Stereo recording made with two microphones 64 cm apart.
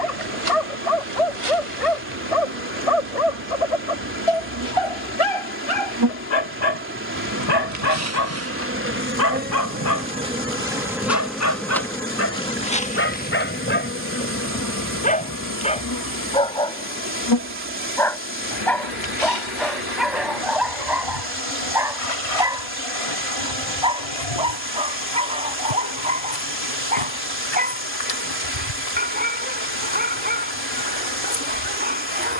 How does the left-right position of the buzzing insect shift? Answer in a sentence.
In this clip you hear the buzzing insect move to the left.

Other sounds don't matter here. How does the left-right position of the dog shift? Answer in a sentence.
You can hear the dog move to the right.